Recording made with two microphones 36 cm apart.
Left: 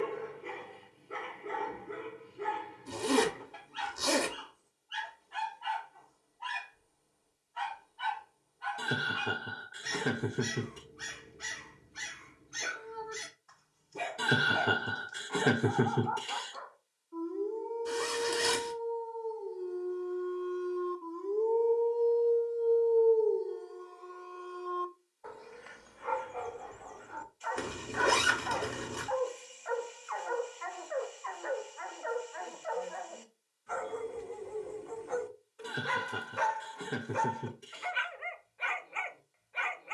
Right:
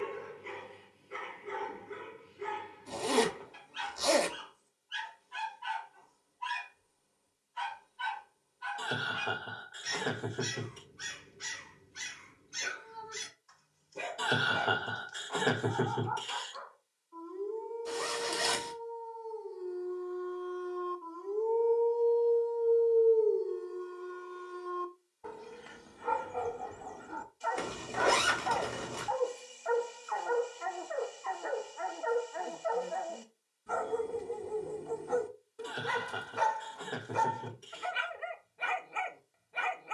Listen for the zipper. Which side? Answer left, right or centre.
left.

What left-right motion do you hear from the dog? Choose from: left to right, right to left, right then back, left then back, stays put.
left to right.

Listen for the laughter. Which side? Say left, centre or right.
left.